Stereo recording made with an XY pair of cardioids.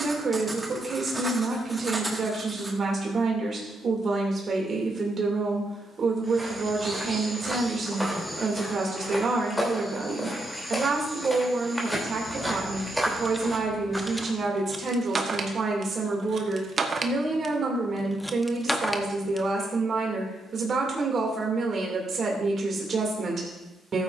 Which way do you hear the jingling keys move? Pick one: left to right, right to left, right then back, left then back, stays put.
right then back.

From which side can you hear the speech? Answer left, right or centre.
right.